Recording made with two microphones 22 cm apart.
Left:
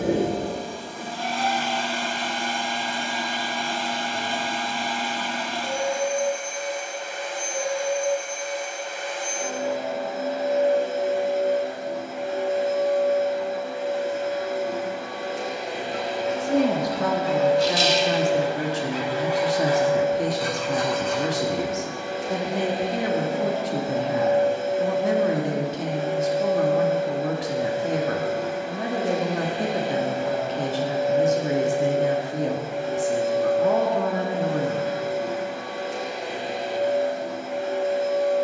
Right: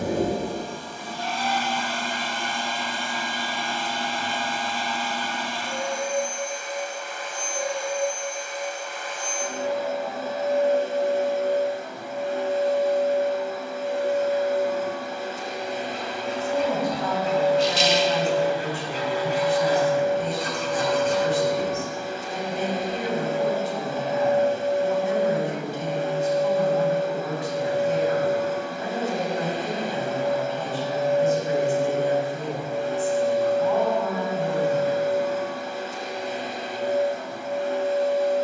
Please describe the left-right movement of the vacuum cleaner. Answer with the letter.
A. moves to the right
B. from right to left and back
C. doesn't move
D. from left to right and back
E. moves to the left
C.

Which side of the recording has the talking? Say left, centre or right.
left.